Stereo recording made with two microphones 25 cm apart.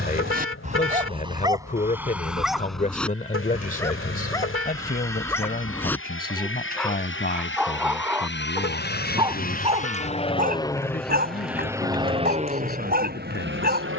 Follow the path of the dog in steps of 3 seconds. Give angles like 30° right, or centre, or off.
20° right, 10° left, centre, 30° right, 40° right.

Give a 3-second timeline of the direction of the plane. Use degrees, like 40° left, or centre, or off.
70° left, 70° left, 60° left, 20° left, 40° right.